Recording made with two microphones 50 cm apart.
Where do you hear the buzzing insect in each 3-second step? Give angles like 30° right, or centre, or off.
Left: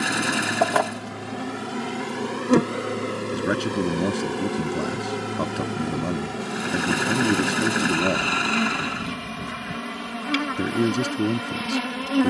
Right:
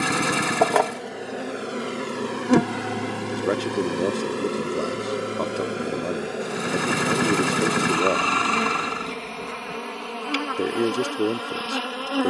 20° left, 10° left, 30° left, 40° left.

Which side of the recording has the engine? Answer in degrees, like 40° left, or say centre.
20° right.